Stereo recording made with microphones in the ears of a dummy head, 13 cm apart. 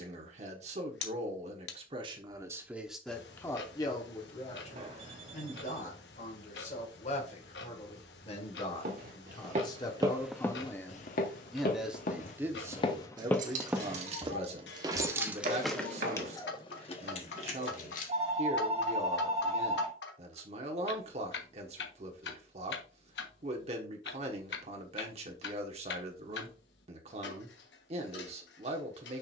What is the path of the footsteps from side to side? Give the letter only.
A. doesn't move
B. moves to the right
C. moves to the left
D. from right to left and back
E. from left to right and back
D.